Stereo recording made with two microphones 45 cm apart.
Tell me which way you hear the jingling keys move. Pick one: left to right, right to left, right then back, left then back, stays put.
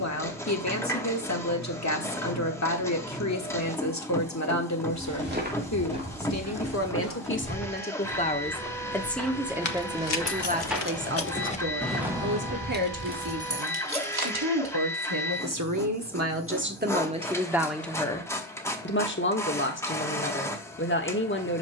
left to right.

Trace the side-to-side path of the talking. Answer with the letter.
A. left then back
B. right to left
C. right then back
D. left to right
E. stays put
C.